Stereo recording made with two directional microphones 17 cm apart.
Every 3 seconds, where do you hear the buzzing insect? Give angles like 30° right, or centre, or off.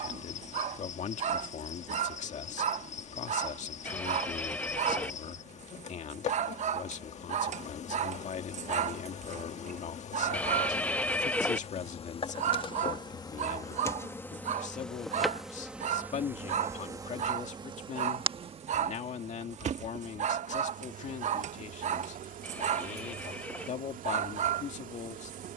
40° left, 40° left, 40° left, 40° left, 20° left, 10° right, 40° right, 50° right, 50° right.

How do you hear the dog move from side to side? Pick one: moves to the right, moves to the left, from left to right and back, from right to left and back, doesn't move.
doesn't move.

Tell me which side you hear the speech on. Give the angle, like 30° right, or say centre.
40° left.